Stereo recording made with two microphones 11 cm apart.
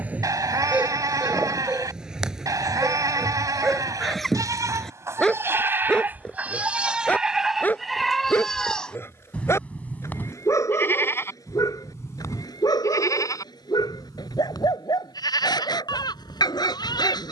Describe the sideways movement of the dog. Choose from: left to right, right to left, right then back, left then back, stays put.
right to left.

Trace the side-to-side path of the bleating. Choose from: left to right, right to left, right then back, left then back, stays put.
right to left.